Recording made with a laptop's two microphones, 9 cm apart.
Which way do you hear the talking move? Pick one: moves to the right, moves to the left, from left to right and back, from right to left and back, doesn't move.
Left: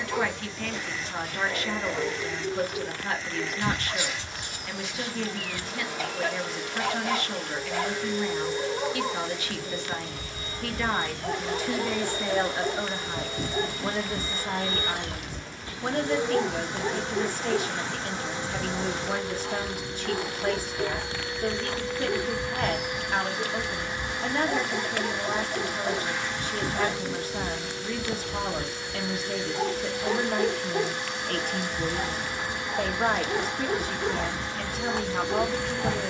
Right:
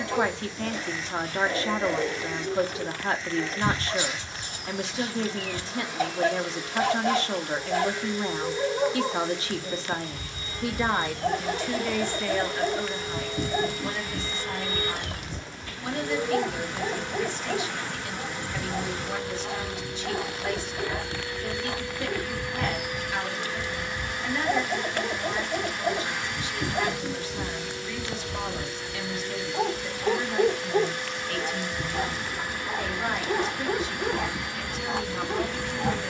moves to the left.